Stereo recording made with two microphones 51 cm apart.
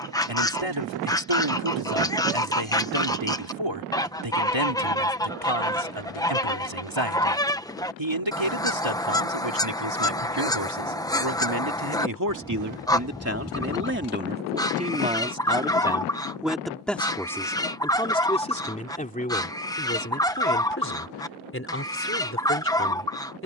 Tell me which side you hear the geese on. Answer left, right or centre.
centre.